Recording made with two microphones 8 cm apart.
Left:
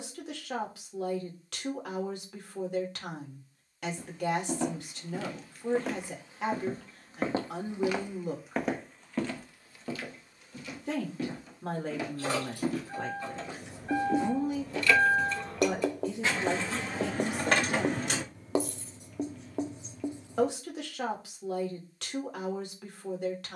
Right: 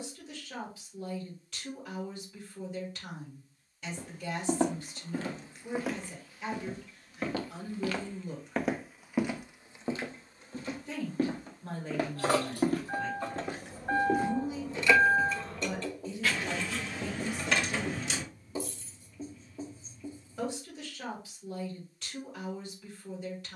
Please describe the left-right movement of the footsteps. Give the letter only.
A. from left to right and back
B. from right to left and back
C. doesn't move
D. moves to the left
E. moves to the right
B.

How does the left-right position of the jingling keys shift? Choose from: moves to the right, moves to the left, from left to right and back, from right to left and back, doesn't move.
moves to the left.